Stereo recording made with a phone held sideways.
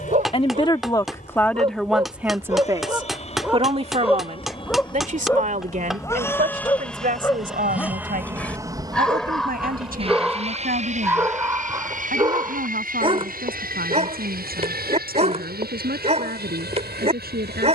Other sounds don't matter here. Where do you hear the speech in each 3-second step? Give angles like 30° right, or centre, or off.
10° left, 50° right, 70° right, 70° right, 80° right, 80° right.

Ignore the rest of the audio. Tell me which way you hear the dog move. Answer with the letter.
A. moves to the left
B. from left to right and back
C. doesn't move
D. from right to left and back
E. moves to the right
D.